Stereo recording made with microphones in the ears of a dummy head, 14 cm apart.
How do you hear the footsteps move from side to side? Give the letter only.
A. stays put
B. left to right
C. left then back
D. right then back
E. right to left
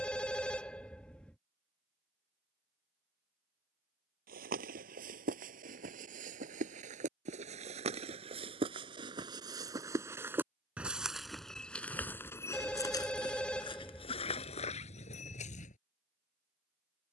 E.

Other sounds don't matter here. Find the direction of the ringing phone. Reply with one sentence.
You can hear the ringing phone in the centre.